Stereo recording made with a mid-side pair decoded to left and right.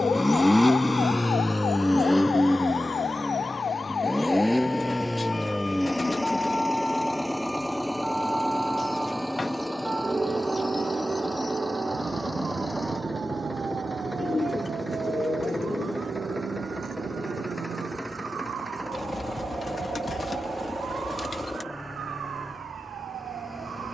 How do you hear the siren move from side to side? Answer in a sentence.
In this clip you hear the siren travel towards the right.